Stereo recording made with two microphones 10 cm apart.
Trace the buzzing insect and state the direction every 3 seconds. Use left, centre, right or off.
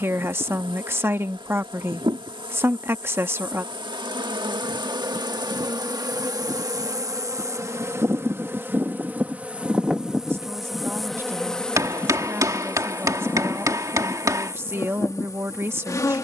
right, right, right, centre, left, left.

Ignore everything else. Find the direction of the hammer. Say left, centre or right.
right.